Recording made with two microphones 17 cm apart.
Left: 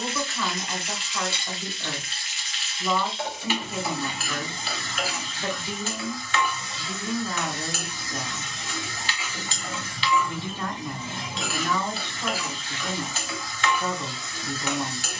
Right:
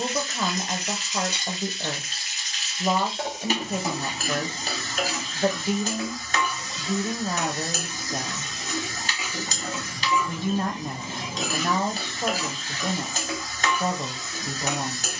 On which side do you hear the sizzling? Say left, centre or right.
right.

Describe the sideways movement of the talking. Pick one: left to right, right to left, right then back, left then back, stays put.
stays put.